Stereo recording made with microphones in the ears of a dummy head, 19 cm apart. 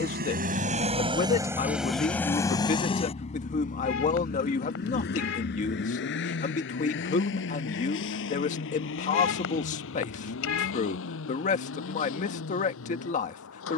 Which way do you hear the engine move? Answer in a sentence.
In this clip you hear the engine move from right to left.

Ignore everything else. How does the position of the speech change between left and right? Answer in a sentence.
In this clip you hear the speech stay in one place.